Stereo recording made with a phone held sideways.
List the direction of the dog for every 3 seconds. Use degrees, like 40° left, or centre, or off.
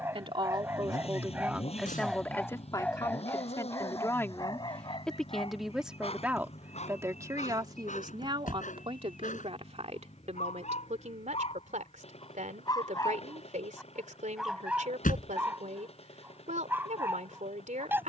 10° right, 30° left, 50° left, 50° left, 10° left, 10° right.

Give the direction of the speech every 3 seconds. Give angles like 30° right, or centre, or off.
10° right, 10° left, 30° right, 50° right, 60° right, 60° right.